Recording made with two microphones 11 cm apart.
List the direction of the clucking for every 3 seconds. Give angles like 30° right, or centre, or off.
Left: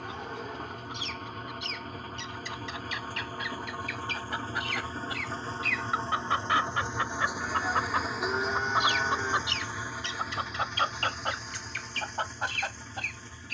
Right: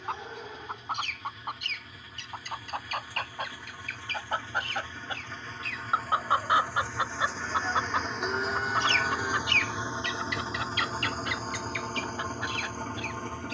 60° right, 40° right, 10° right, 30° left, 50° left.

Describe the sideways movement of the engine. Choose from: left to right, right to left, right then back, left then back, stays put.
left to right.